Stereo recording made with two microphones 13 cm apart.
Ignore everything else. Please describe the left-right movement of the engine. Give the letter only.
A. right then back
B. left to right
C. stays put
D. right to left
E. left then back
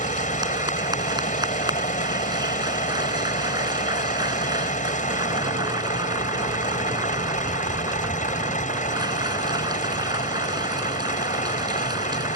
C.